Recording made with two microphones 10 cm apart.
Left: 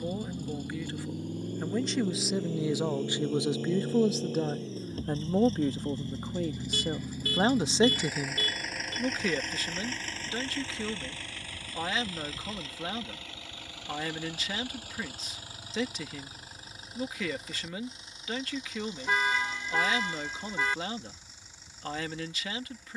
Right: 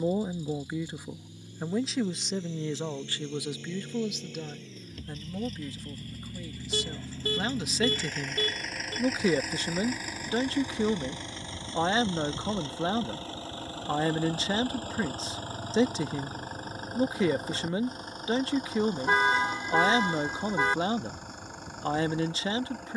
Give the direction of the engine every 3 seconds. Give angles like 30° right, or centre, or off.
50° left, 40° left, 10° left, 10° right, 30° right, 40° right, 50° right, 60° right.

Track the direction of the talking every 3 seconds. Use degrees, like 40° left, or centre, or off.
10° right, 40° left, 40° left, 30° right, 30° right, 30° right, 30° right, 30° right.